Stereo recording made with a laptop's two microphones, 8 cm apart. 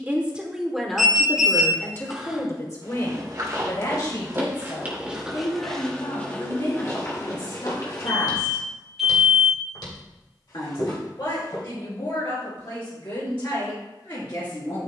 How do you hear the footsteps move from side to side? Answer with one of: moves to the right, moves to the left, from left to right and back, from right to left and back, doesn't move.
moves to the left.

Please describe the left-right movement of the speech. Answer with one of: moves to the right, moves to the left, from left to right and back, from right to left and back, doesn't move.
moves to the left.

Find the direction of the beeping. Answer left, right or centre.
centre.